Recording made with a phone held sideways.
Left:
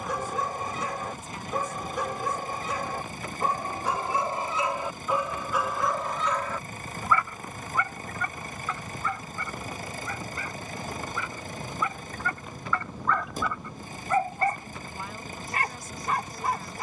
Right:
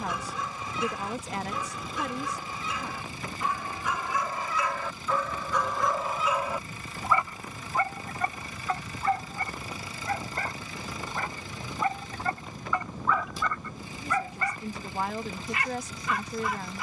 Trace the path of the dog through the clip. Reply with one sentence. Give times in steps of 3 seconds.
You can hear the dog on the left from 0 s, on the right from 6 s, in the centre from 12 s and on the left from 15 s.